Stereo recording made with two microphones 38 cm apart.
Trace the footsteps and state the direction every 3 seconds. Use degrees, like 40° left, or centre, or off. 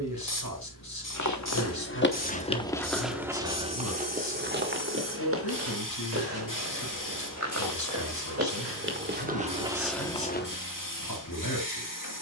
30° left, 20° right, 40° right, centre.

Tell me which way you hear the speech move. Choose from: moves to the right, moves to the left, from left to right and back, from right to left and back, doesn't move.
doesn't move.